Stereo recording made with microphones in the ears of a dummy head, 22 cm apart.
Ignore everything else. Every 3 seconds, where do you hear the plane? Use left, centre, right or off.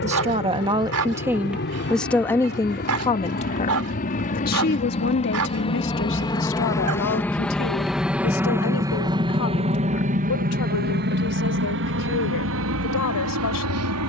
left, left, centre, right, right.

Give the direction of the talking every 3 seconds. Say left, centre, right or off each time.
centre, left, left, left, left.